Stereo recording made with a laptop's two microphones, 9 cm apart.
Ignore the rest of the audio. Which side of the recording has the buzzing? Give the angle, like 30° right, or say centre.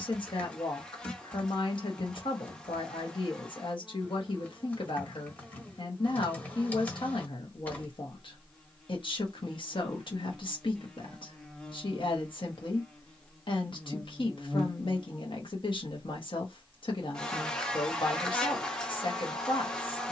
10° left.